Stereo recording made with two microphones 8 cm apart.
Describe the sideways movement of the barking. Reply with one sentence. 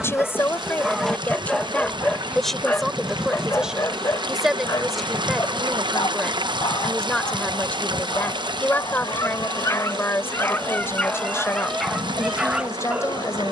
You can hear the barking go left and come back.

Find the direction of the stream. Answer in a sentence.
You can hear the stream on the right.